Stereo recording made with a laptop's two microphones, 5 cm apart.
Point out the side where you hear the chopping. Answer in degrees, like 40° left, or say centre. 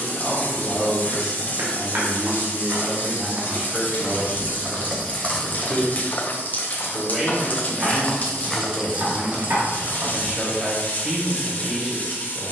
60° right.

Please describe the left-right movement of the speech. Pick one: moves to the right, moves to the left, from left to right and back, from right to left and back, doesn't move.
doesn't move.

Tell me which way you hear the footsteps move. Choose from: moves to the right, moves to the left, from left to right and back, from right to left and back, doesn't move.
from right to left and back.